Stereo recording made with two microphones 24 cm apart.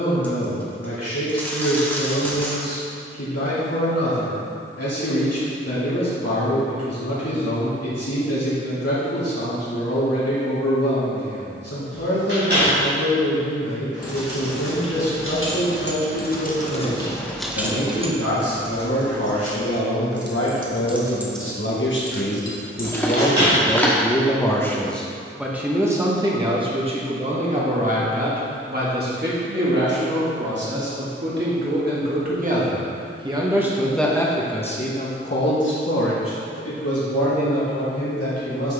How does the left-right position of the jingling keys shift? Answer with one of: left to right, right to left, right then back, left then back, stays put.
right then back.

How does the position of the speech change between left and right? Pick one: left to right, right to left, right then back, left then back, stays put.
right then back.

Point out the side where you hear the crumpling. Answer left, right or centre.
centre.